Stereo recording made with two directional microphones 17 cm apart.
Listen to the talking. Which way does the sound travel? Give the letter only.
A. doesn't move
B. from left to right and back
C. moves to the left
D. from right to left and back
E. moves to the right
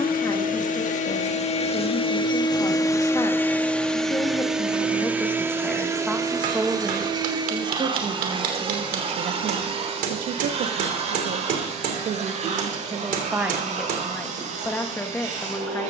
B.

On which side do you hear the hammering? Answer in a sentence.
In this clip you hear the hammering on the right.